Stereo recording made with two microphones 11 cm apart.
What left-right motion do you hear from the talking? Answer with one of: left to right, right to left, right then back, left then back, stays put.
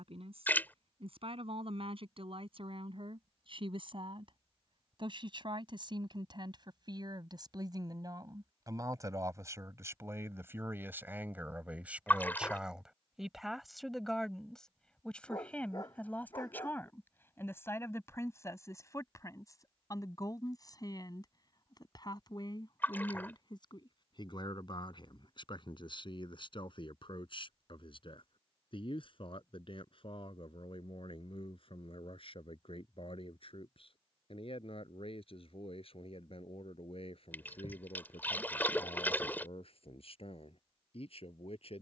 right to left.